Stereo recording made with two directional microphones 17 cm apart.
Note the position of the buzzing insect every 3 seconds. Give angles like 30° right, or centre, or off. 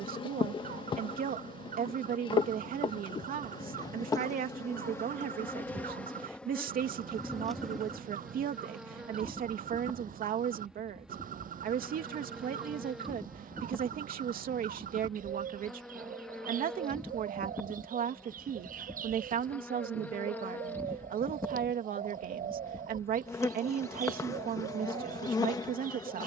30° left, 20° left, centre, centre, centre, centre, 10° left, 20° left, 20° left.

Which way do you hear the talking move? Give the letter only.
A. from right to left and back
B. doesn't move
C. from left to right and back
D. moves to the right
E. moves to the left
B.